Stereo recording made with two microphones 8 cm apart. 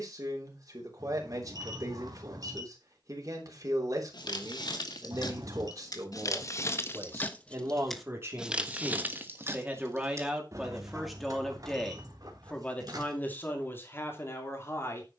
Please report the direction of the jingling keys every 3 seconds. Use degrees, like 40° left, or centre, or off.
off, 60° left, 10° left, 40° right, 60° right.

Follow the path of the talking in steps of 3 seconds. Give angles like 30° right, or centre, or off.
50° right, 50° right, 40° right, 10° right, 30° left.